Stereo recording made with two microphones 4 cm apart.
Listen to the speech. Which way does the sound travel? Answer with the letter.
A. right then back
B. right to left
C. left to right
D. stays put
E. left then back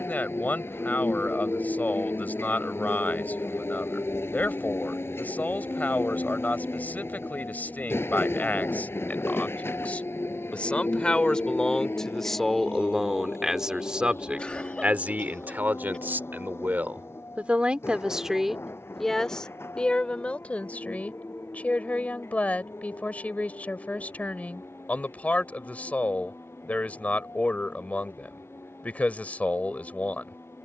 A.